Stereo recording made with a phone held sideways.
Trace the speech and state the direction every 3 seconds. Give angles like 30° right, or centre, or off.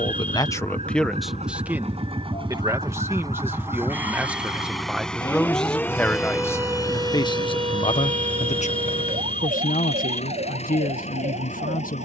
centre, 10° right, 40° left, 70° left.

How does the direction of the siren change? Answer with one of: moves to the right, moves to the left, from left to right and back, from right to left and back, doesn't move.
moves to the right.